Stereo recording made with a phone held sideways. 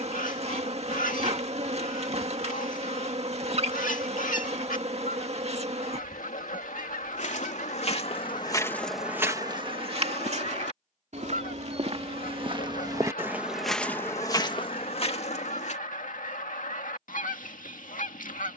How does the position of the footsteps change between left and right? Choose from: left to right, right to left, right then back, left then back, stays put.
right then back.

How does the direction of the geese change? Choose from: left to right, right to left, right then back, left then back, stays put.
stays put.